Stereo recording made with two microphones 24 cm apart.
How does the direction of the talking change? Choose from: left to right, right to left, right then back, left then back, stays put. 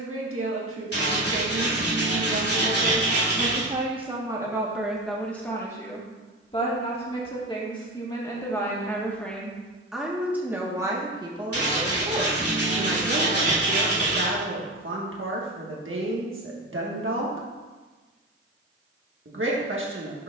left then back.